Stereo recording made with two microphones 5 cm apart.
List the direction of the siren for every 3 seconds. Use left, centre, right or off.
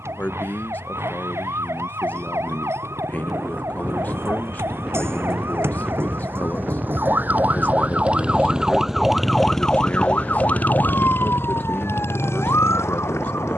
right, right, right, left, left.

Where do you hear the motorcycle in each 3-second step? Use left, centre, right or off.
right, right, right, left, left.